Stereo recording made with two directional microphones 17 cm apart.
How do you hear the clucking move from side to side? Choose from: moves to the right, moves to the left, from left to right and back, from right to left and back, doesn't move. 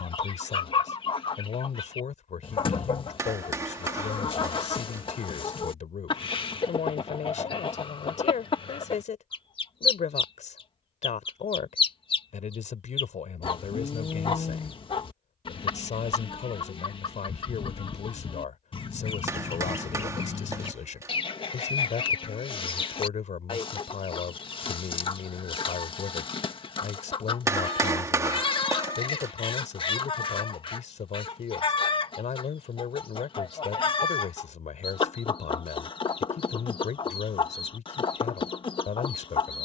doesn't move.